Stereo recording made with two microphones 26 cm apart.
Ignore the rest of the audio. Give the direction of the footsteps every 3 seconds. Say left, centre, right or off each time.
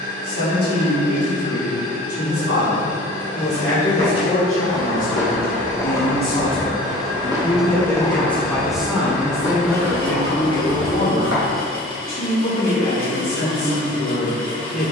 off, left, centre, left, off.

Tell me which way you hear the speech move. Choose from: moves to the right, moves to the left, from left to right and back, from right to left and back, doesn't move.
from left to right and back.